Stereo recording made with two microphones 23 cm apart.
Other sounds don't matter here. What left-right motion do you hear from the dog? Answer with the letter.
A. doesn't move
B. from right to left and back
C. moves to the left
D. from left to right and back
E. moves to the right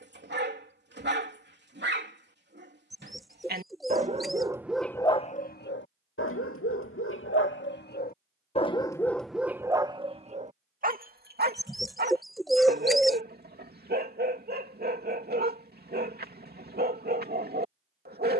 B.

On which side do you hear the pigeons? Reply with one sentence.
In this clip you hear the pigeons in the centre.